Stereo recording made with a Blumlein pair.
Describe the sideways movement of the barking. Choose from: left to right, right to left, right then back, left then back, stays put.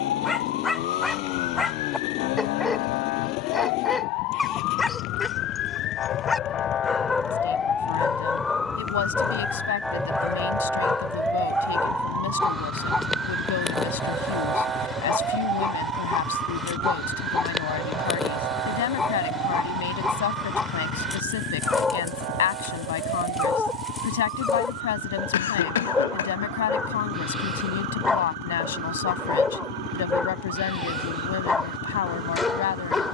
stays put.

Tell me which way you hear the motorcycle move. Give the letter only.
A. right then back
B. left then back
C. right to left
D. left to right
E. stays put
E.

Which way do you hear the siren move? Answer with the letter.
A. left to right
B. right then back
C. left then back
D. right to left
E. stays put
A.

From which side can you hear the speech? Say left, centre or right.
left.